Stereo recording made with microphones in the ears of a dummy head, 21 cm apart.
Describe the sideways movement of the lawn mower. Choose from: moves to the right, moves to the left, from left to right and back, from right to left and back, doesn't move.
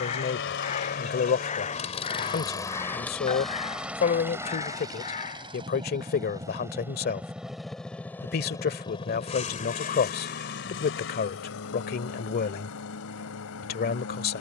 from left to right and back.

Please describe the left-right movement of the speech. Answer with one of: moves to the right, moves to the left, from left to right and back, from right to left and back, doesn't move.
doesn't move.